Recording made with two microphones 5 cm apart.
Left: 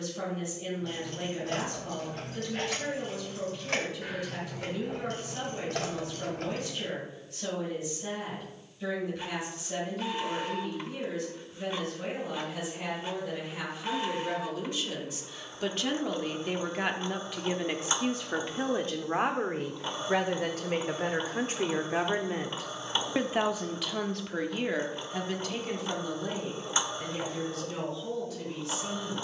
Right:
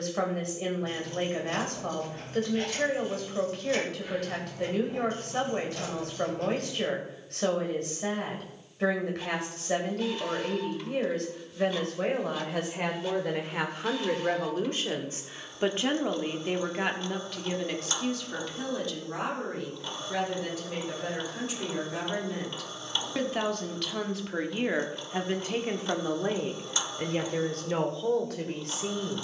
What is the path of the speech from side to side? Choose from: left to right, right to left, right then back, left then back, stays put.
left then back.